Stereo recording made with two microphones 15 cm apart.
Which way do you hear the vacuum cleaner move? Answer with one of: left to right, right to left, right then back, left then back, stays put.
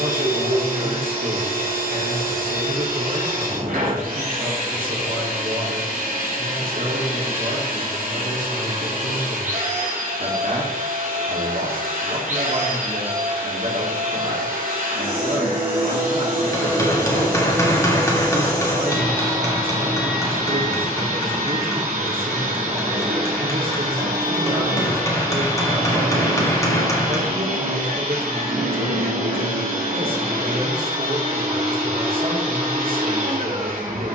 stays put.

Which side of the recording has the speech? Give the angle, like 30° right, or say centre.
70° right.